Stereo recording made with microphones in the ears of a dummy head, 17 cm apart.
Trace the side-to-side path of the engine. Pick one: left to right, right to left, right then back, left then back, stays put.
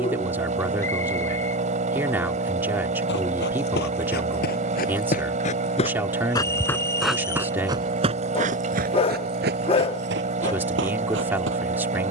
stays put.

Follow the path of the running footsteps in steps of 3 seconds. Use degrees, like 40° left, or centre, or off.
off, 50° left, 20° right, 70° right.